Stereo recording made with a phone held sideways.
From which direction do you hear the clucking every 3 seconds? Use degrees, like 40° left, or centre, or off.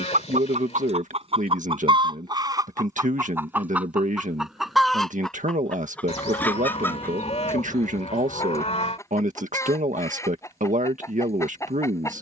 40° right, 10° right, 20° left, 20° left.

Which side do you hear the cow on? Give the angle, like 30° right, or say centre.
50° left.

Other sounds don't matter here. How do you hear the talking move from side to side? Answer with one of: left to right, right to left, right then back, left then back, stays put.
stays put.